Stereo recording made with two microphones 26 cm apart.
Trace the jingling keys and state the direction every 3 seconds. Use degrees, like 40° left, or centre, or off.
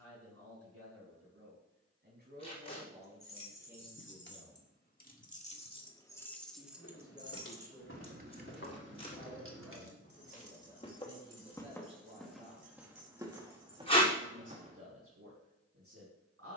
off, 40° left, 20° right, 60° right, 70° right, off.